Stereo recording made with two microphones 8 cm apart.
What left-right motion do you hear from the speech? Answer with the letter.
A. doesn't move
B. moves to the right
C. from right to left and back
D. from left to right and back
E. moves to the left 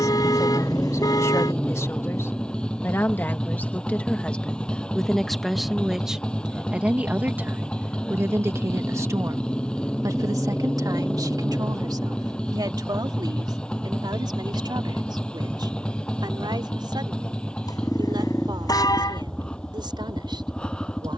B.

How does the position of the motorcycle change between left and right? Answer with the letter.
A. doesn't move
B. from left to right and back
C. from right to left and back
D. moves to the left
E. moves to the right
A.